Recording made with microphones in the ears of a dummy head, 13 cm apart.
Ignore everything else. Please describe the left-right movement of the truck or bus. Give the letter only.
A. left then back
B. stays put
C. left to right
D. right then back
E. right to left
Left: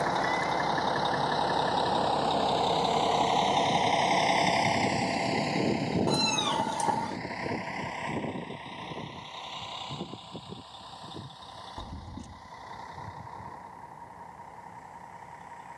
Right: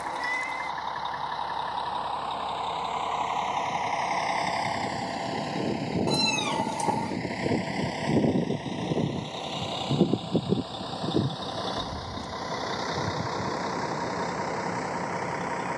C.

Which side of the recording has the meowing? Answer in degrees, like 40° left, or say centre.
10° right.